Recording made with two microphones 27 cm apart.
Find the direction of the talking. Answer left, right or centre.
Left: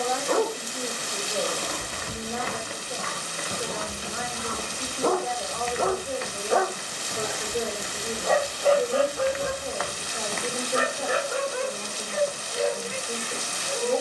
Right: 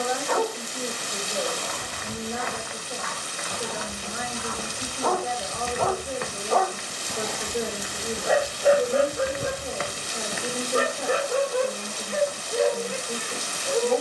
centre.